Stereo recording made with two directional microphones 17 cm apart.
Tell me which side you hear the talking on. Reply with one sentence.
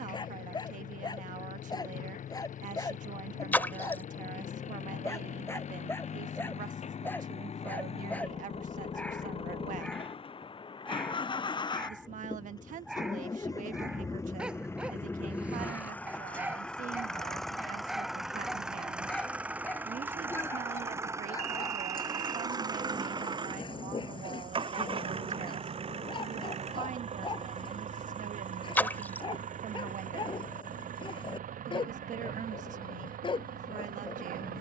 In this clip you hear the talking on the right.